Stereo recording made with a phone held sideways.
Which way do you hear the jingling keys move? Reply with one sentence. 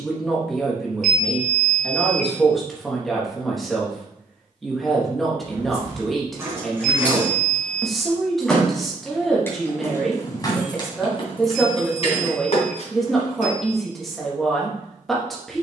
You can hear the jingling keys travel towards the left.